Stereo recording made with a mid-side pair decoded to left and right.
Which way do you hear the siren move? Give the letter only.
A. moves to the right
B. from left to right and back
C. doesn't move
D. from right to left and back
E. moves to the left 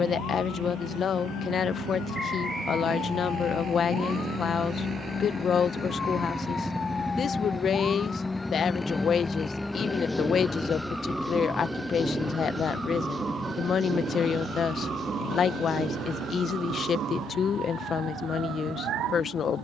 A.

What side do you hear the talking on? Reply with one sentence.
You can hear the talking on the left.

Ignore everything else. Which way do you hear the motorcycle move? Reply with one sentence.
You can hear the motorcycle move from right to left.